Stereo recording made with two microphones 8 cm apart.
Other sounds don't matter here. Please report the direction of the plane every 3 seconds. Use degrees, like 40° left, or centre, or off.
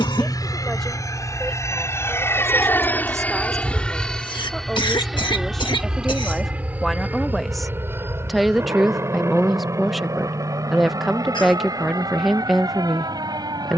40° left, centre, 20° right, 40° right, 50° right.